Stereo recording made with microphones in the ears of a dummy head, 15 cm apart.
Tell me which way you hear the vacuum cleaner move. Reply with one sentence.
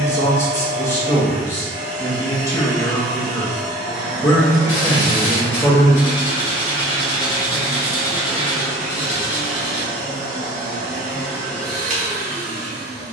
In this clip you hear the vacuum cleaner stay put.